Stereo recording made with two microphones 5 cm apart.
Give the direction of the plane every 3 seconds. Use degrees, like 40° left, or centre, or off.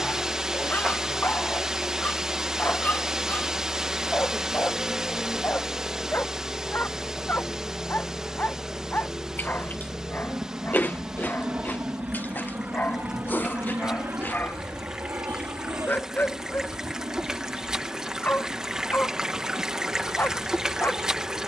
40° left, 30° left, centre, 20° right, 40° right, 60° right, 70° right.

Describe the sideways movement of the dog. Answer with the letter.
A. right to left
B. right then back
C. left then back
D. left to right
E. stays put
E.